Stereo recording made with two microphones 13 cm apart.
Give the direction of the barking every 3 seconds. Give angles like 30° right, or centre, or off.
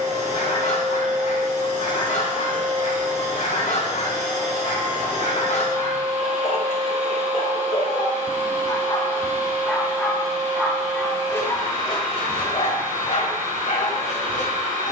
70° left, 70° left, 50° left, 10° left, 60° left.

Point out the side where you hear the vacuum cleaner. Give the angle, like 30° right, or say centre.
80° right.